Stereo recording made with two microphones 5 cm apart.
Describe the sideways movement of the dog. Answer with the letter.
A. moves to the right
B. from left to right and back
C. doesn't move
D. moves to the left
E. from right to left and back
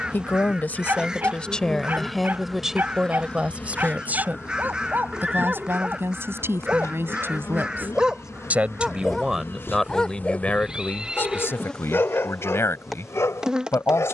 D.